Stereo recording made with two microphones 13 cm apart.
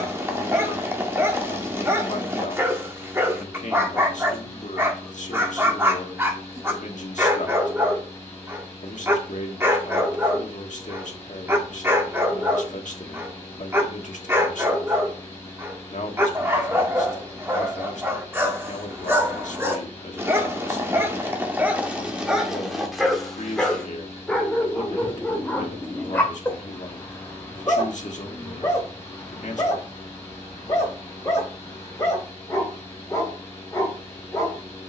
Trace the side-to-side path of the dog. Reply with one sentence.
In this clip you hear the dog travel towards the left.